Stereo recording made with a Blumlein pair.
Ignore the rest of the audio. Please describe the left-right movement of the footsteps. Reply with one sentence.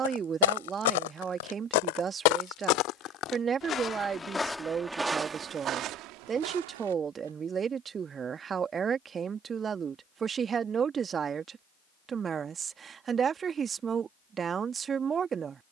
You can hear the footsteps go from the left side to the right.